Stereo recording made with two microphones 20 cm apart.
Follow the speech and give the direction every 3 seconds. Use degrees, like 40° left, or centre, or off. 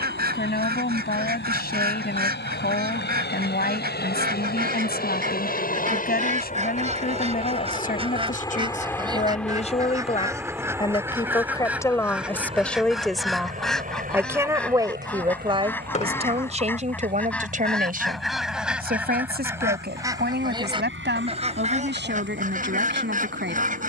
50° left, 50° left, 50° left, 30° left, centre, 30° right, 50° right, 60° right.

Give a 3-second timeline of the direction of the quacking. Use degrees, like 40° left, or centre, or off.
50° right, 50° right, 30° right, 10° right, centre, 10° left, 10° right, 40° right.